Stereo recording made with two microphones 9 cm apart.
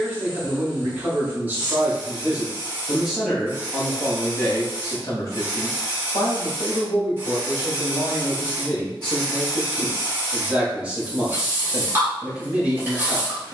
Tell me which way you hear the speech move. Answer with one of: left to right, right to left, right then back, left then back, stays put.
left then back.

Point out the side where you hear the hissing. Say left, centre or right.
right.